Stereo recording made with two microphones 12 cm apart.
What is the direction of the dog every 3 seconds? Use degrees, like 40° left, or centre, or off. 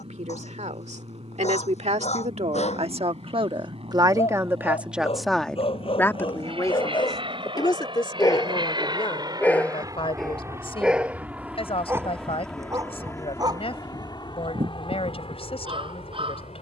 70° left, 60° left, 40° left, centre, 30° right, 50° right.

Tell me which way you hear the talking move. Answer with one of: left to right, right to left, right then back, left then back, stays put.
right to left.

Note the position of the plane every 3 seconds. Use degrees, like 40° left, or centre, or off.
70° right, 60° right, 50° right, 20° right, 20° left, 50° left.